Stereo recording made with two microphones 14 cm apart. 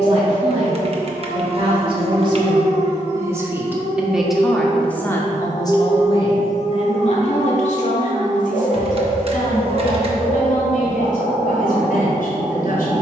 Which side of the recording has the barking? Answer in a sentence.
In this clip you hear the barking on the left.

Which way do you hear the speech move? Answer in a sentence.
In this clip you hear the speech move from right to left.